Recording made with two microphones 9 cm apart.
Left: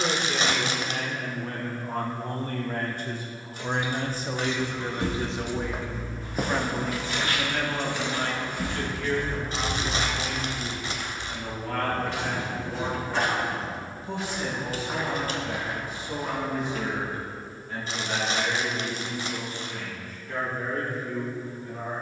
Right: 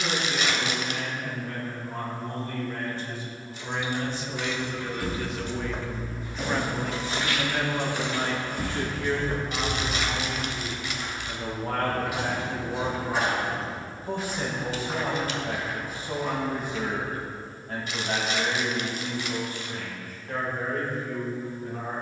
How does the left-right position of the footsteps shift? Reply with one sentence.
You can hear the footsteps move from left to right and back again.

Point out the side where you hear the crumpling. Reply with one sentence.
You can hear the crumpling on the left.